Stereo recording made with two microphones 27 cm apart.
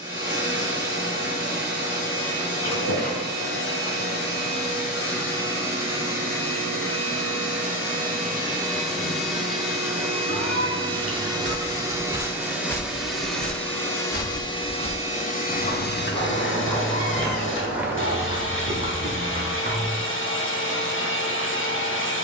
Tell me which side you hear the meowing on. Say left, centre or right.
right.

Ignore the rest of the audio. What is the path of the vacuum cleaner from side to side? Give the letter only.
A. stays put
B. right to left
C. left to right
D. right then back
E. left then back
B.